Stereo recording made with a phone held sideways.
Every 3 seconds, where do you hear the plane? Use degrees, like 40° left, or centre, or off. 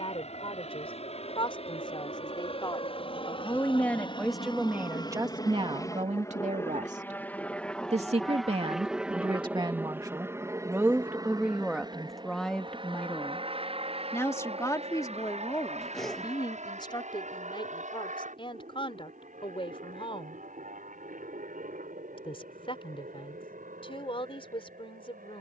50° left, 40° left, 10° left, 20° right, 40° right, 50° right, 60° right, 60° right, 70° right.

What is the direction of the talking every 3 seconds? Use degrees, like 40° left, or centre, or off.
40° left, 10° right, 50° right, 20° right, 10° left, 30° left, 40° left, 40° left, 40° left.